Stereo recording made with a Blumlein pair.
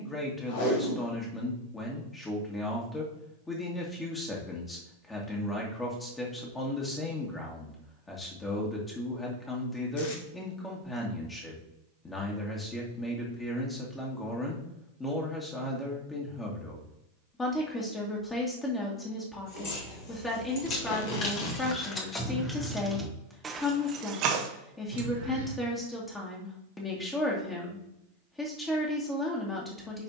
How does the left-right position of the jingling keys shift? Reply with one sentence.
You can hear the jingling keys go from the left side to the right.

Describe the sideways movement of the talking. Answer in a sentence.
You can hear the talking stay put.